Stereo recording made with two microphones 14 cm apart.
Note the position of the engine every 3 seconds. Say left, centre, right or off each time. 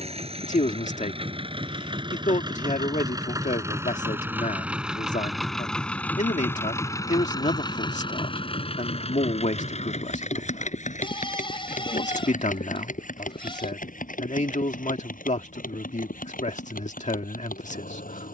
right, centre, left, left, left, left.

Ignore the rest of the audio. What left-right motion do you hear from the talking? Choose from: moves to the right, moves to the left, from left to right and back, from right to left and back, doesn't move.
doesn't move.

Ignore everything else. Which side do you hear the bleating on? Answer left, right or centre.
left.